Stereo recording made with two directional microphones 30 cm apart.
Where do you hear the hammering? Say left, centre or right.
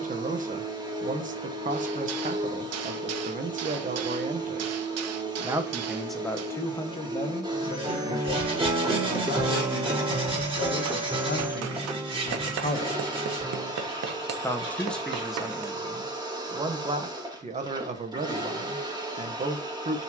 right.